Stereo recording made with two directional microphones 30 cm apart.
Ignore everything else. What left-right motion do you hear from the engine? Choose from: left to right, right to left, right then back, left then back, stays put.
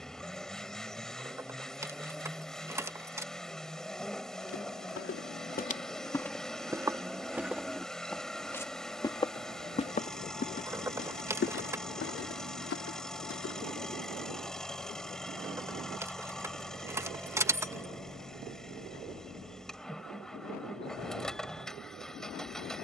stays put.